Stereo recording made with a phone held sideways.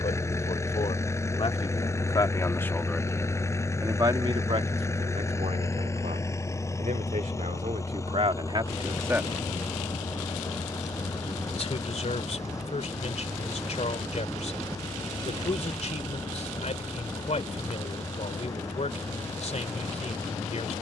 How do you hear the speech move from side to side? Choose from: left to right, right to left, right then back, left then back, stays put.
right then back.